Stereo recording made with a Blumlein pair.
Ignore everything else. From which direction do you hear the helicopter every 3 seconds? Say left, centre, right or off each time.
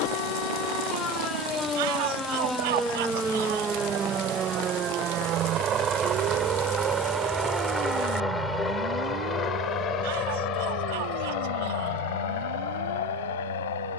right, right, centre, left, left.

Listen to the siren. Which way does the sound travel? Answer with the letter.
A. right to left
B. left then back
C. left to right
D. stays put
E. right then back
C.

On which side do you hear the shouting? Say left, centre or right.
right.